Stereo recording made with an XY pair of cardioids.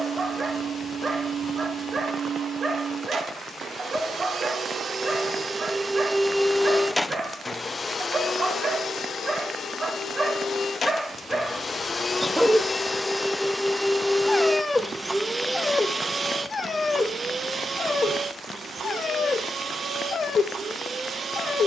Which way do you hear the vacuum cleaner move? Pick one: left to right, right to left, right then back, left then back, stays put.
left then back.